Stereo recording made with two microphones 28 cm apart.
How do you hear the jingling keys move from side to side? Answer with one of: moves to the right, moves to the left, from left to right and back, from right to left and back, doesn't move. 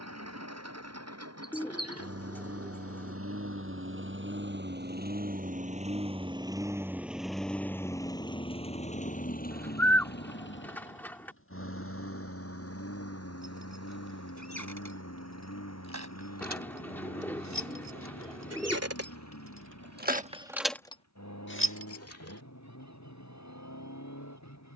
moves to the left.